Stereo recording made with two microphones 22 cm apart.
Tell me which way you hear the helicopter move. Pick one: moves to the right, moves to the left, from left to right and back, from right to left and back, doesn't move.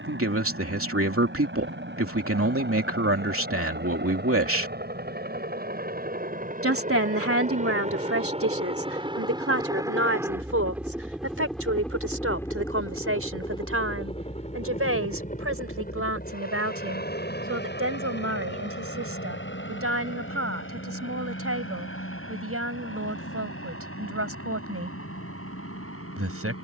moves to the left.